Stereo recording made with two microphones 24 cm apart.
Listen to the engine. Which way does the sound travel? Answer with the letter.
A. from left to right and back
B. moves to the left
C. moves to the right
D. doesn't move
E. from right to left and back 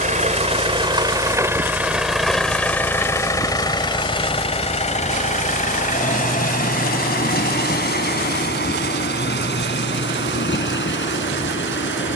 B.